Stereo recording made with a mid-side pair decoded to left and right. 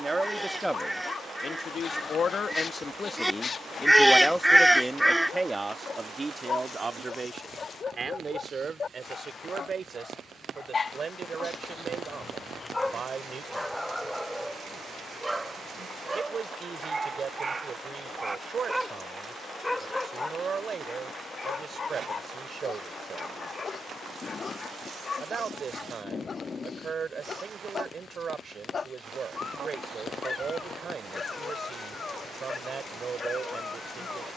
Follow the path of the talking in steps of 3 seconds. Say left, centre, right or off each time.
left, centre, right, right, right, right, right, right, right, right, right, right.